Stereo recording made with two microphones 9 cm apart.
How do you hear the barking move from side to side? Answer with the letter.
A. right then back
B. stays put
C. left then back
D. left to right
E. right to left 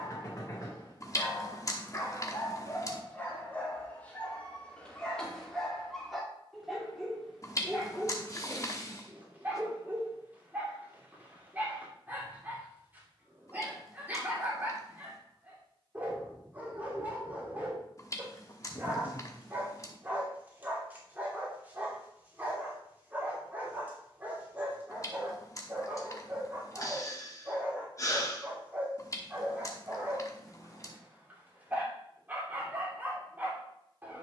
D.